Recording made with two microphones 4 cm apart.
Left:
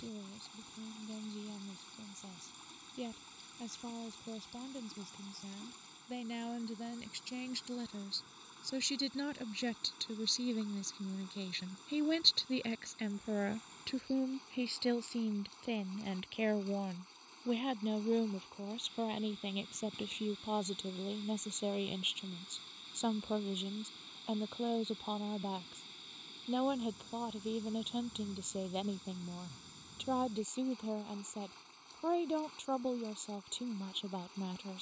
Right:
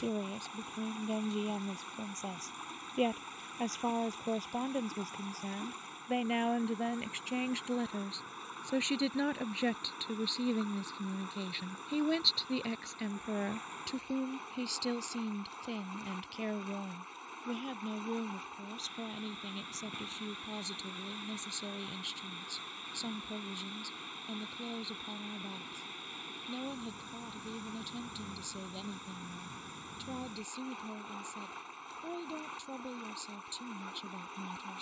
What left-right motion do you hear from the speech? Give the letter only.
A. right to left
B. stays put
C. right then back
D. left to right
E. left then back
A.